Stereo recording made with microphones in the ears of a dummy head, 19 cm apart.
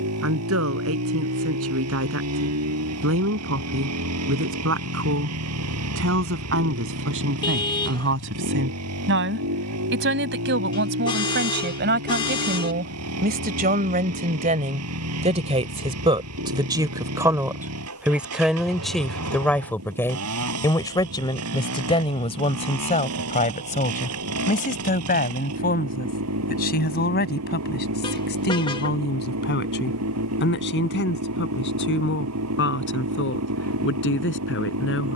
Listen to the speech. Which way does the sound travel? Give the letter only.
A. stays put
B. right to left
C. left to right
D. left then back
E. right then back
B.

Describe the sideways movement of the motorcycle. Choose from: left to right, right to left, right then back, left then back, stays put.
stays put.